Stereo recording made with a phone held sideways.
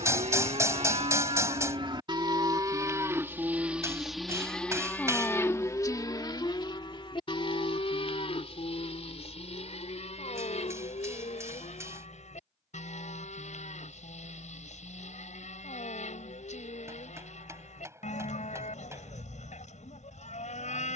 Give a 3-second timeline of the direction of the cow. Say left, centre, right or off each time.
right, centre, left, left, left, left, left.